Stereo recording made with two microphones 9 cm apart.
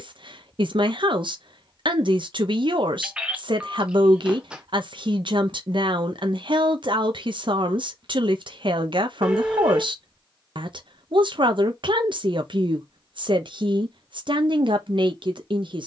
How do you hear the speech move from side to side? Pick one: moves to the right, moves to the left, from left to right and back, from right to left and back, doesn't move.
doesn't move.